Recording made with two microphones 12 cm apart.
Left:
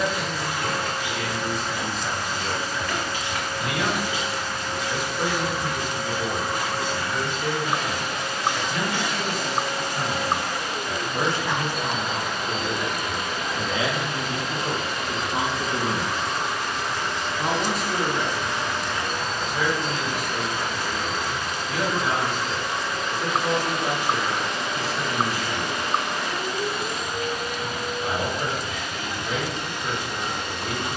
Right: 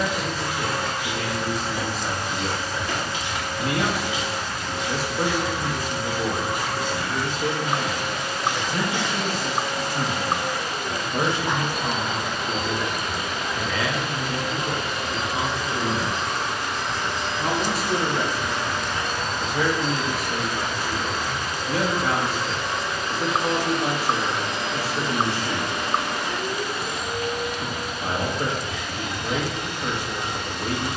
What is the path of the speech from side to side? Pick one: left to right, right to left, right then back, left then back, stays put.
left then back.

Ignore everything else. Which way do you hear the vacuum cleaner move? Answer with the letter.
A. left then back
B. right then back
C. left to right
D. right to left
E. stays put
E.